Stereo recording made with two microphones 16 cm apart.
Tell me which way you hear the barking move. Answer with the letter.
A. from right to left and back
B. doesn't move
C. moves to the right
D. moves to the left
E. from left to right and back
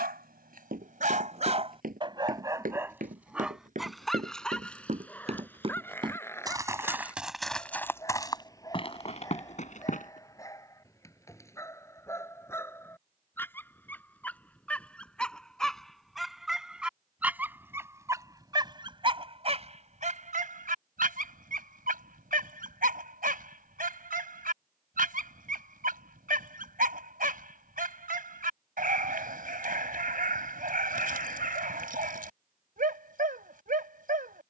A.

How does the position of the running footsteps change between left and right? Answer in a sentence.
You can hear the running footsteps go from the right side to the left.